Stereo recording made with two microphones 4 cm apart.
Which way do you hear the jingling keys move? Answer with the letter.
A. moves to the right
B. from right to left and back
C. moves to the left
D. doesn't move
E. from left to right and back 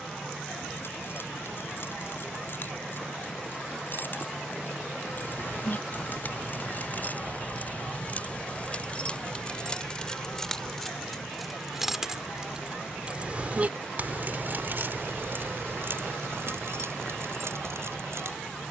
A.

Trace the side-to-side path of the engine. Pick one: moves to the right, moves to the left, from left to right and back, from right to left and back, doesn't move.
doesn't move.